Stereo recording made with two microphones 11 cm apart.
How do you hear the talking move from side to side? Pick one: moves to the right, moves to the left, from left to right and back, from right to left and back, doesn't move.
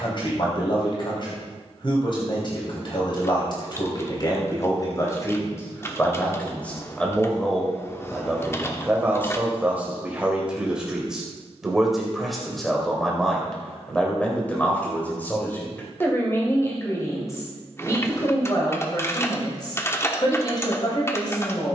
from left to right and back.